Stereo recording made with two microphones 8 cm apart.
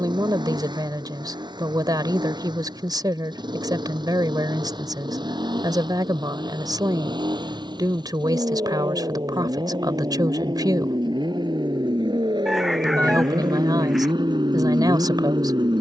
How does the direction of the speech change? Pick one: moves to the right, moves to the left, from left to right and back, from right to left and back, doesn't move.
doesn't move.